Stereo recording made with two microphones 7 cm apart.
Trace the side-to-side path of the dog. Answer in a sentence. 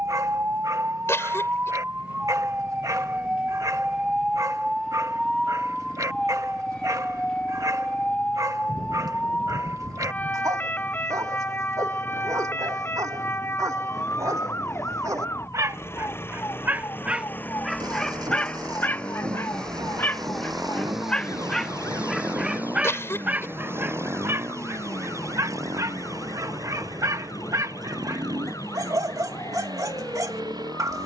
You can hear the dog go left and come back.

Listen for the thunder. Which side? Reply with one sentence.
In this clip you hear the thunder on the right.